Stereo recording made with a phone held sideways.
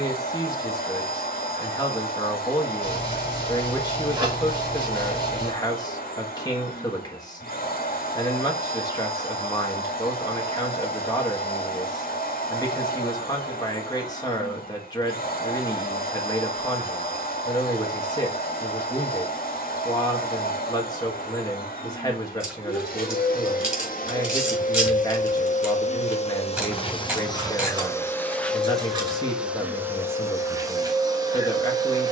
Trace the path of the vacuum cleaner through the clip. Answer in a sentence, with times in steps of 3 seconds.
You can hear the vacuum cleaner on the left from 0 s, in the centre from 27 s and on the right from 30 s.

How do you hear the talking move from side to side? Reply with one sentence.
In this clip you hear the talking stay put.